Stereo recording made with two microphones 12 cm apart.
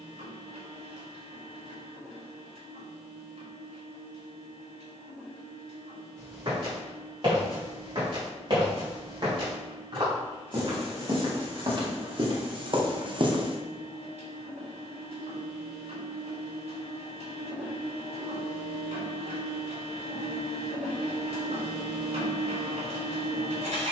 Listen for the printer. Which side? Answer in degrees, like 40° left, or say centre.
70° right.